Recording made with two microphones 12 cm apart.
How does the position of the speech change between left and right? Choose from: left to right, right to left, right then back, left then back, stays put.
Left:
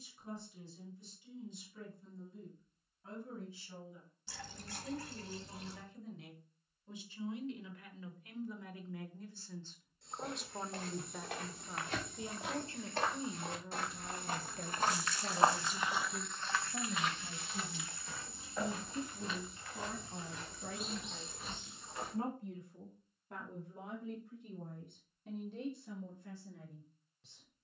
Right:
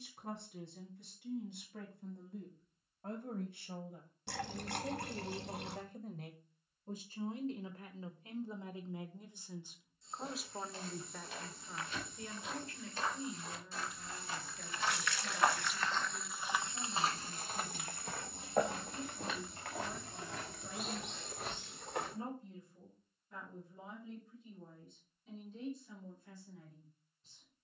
right to left.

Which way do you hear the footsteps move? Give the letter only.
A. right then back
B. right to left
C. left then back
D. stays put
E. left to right
E.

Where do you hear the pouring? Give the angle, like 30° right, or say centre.
70° right.